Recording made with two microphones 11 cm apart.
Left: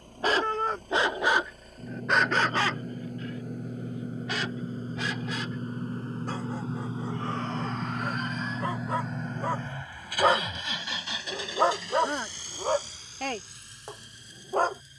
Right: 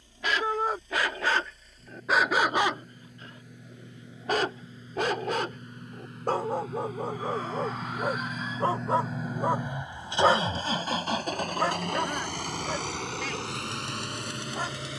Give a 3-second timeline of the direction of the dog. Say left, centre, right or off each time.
centre, right, right, centre, left.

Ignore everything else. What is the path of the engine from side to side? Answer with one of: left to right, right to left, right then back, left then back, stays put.
left to right.